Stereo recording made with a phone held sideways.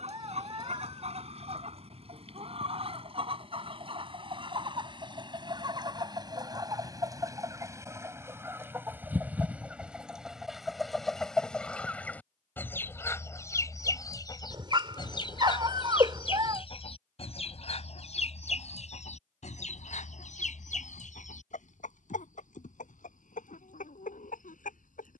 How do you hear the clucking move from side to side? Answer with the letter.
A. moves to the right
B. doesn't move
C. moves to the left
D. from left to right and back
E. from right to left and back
C.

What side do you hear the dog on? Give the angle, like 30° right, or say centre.
30° right.